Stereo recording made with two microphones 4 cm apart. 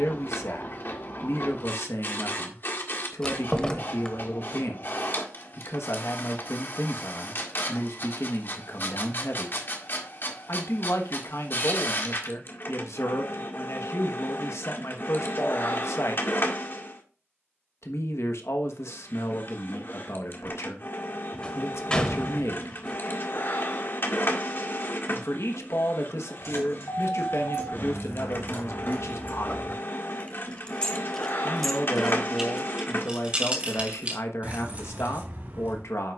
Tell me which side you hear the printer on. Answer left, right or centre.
left.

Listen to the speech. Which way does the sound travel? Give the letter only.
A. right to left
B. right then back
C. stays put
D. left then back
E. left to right
C.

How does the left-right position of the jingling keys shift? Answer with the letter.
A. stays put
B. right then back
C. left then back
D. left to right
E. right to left
D.